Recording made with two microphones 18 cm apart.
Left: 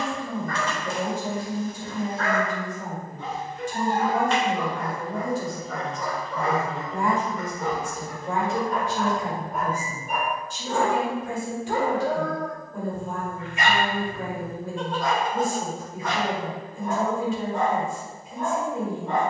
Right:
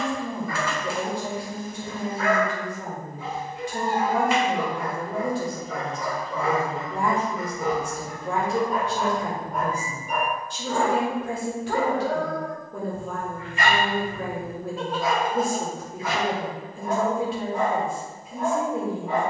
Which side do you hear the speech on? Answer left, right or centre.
right.